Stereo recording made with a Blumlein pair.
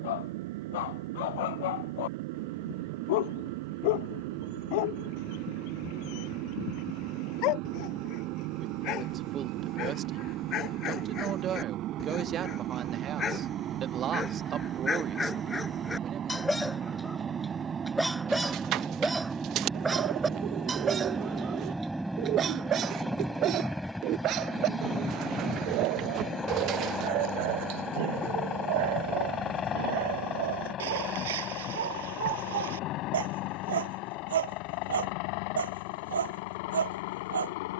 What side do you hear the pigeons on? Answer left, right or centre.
right.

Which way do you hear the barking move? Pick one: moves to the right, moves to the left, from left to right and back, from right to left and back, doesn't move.
moves to the right.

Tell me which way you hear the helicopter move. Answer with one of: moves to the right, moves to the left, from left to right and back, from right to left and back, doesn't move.
moves to the left.